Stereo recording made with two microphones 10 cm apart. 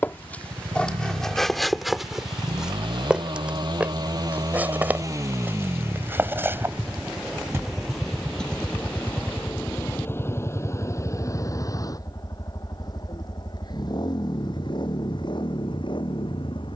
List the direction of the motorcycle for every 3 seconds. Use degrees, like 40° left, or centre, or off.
60° right, 40° right, centre, 30° left, 40° left, 50° left.